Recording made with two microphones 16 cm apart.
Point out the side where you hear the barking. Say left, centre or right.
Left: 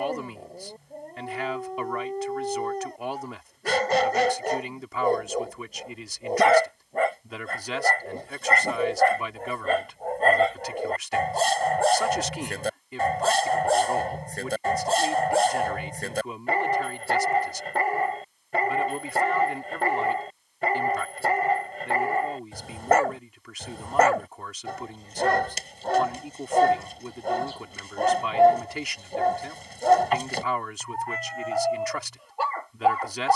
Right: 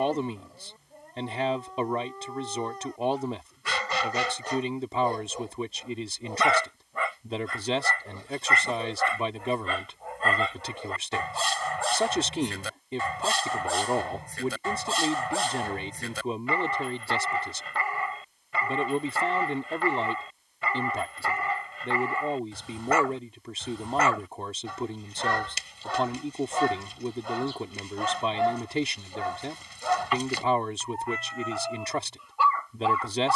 left.